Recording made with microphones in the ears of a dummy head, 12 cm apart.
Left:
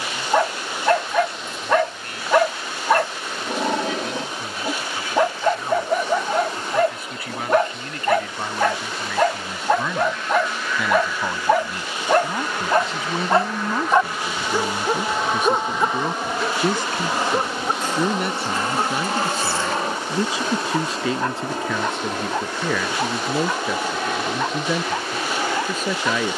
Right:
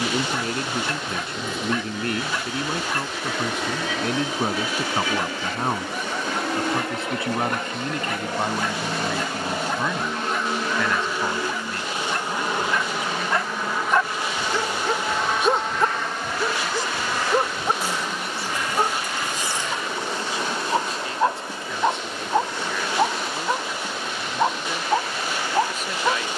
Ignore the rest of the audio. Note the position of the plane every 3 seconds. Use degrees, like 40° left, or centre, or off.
70° right, 60° right, 50° right, 30° right, centre, 20° left, 30° left, 40° left, 50° left.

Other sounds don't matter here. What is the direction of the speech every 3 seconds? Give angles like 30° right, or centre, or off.
50° right, 40° right, 20° right, centre, 30° left, 40° left, 60° left, 60° left, 70° left.